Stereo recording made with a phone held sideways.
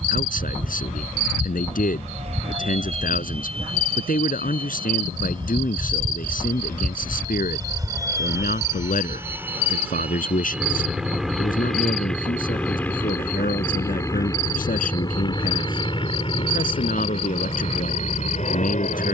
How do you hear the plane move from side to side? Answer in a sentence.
In this clip you hear the plane travel towards the left.